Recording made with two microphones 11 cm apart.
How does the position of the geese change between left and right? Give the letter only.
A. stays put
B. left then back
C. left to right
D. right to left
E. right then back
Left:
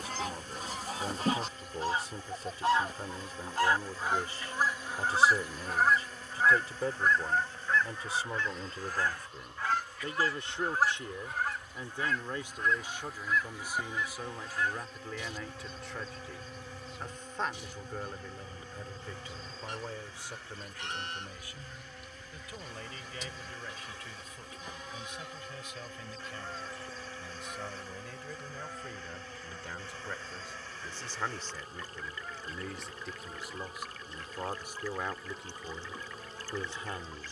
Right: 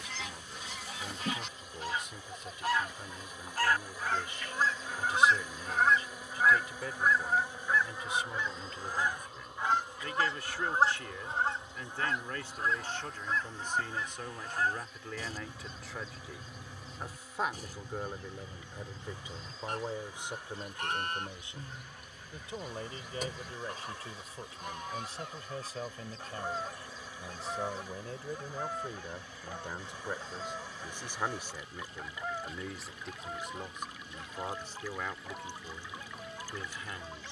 C.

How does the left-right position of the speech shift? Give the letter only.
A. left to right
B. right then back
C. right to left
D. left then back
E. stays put
B.